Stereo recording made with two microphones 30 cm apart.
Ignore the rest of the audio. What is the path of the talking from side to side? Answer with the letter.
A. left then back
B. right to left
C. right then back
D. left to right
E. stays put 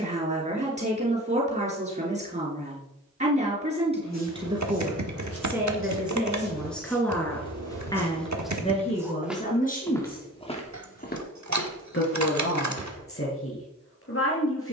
B.